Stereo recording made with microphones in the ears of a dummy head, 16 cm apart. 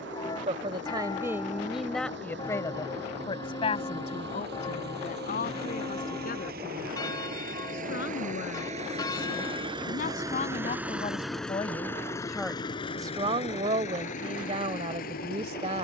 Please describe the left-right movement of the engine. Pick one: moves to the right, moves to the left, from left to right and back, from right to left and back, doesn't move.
moves to the left.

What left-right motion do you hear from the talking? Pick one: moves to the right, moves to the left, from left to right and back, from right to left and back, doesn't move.
from right to left and back.